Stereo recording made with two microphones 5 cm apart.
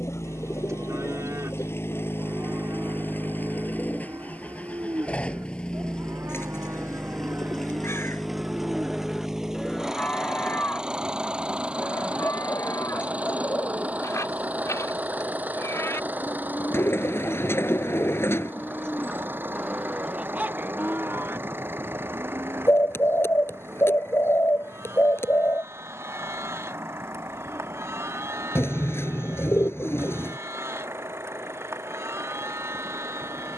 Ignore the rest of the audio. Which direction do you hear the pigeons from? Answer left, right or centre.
left.